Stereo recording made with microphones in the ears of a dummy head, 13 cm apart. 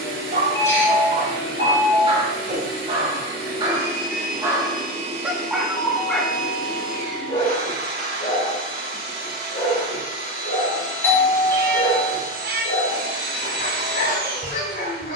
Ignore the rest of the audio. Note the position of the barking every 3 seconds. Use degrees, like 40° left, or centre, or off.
40° right, 20° right, 30° left, 50° left, 50° left.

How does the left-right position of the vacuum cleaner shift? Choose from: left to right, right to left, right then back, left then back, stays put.
stays put.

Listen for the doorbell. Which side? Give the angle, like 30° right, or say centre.
20° left.